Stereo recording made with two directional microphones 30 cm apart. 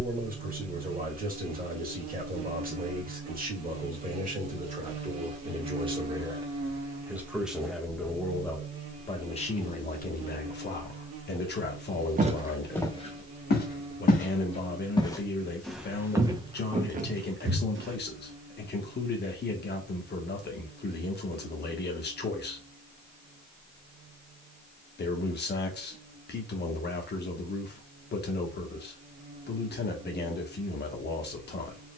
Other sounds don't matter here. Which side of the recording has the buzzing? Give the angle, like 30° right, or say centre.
70° right.